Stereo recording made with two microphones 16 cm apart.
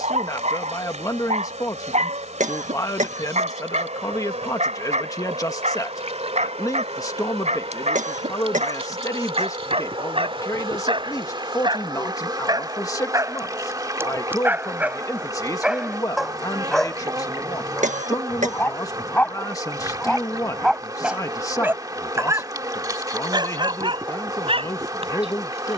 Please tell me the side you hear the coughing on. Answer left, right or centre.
right.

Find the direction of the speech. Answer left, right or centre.
left.